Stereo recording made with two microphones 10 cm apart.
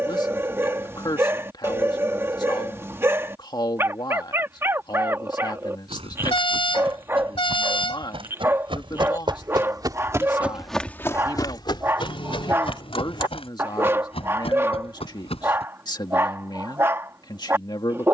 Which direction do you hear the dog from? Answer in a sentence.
In this clip you hear the dog on the right.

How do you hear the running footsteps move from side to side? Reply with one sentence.
You can hear the running footsteps go from the right side to the left.